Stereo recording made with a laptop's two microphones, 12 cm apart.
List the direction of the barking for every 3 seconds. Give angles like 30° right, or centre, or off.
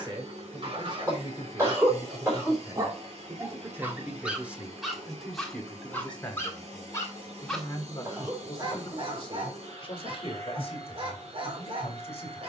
50° right, 10° right, 10° right, 50° right.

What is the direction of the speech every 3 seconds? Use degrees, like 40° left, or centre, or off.
40° right, 10° right, 30° left, 50° left.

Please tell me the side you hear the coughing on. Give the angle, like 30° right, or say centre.
20° right.